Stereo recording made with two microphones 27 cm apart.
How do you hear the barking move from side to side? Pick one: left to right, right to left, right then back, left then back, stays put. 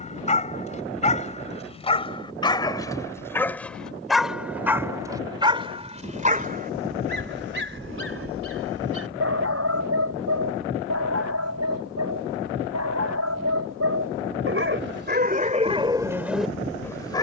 right then back.